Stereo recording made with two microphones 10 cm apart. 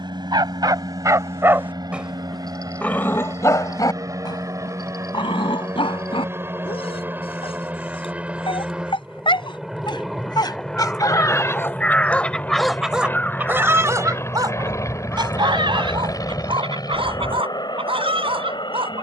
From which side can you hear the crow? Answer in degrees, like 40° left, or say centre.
10° left.